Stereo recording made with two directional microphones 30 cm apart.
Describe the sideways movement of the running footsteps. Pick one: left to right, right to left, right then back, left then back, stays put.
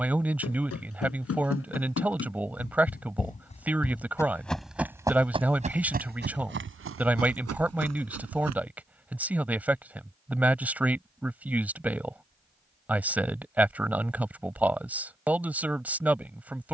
left to right.